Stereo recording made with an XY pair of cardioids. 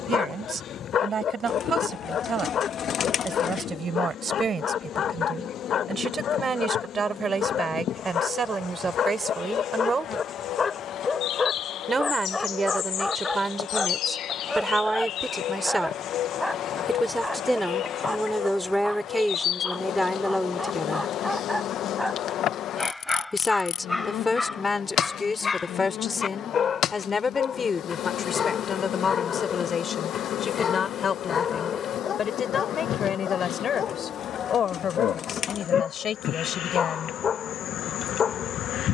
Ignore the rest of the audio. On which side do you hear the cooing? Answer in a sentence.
You can hear the cooing on the left.